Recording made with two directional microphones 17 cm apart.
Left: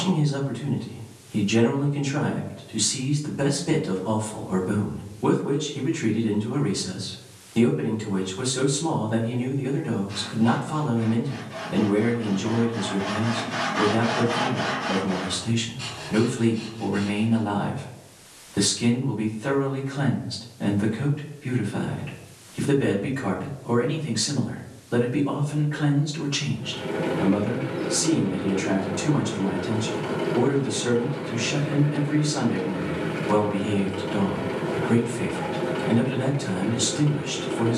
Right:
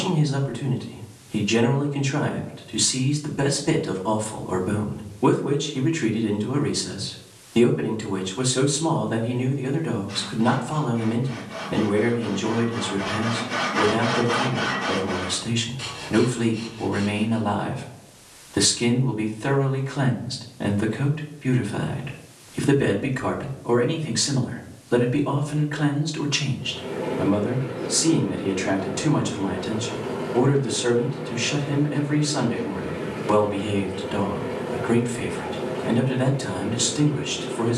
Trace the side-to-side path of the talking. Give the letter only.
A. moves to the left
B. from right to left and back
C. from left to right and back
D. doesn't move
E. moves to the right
D.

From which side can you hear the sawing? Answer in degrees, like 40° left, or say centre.
30° right.